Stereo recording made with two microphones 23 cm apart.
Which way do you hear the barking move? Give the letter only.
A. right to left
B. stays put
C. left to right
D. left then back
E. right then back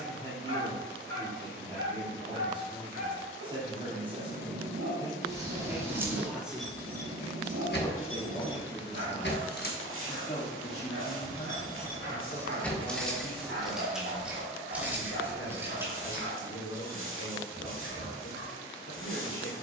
B.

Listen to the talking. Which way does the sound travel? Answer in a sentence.
In this clip you hear the talking move to the left.